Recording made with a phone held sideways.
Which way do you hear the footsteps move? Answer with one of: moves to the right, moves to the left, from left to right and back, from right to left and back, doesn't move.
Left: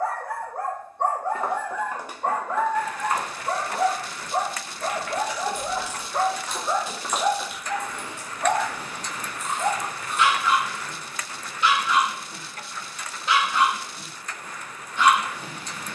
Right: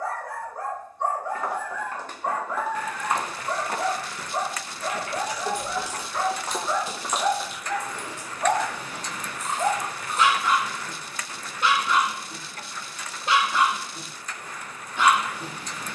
from left to right and back.